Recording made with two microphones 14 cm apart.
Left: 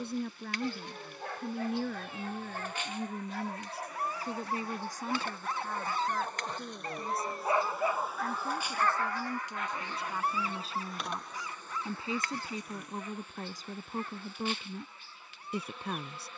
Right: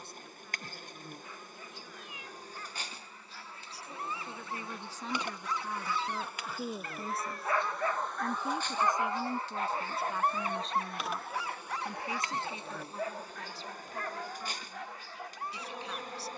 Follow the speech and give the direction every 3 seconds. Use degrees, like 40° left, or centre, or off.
60° left, 20° left, 20° right, centre, 40° left, 50° left.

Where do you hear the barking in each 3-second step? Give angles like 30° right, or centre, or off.
70° left, 50° left, 20° left, 40° right, 70° right, 80° right.